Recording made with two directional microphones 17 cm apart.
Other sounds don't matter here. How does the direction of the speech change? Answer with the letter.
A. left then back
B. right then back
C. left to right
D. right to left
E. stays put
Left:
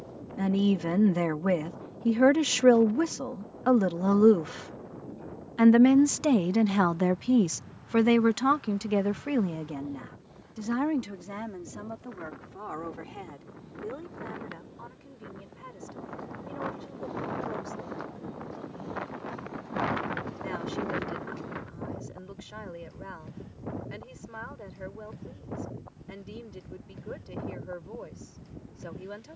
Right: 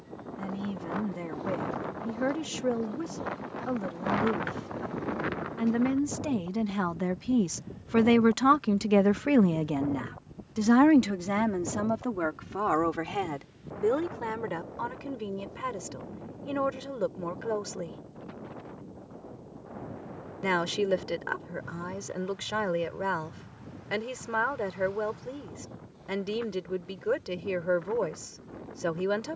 C.